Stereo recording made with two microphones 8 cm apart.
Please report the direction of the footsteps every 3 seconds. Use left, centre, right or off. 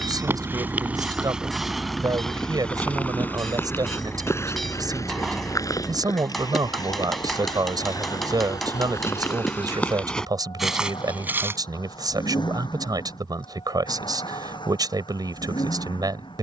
centre, left, left, centre, off, off.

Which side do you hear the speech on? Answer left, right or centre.
right.